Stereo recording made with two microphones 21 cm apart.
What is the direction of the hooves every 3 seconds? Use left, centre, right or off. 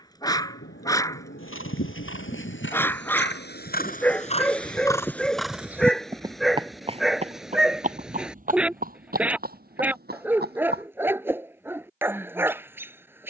left, left, right, right, off.